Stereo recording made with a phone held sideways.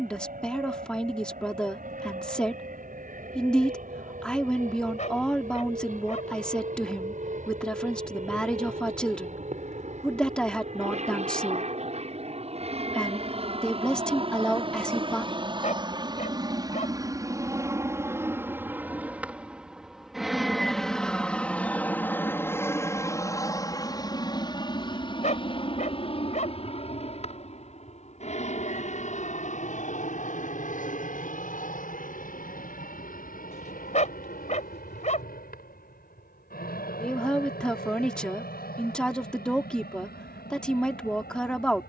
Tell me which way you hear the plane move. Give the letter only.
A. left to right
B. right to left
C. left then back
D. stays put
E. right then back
B.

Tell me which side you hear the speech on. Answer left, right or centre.
centre.